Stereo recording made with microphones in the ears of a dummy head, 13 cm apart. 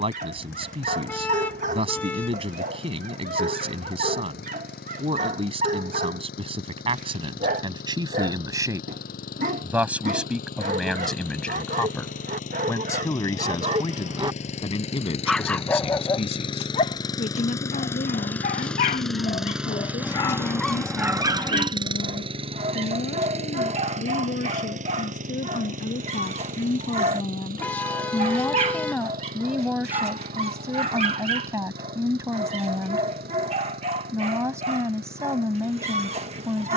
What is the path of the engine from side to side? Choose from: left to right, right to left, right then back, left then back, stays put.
left to right.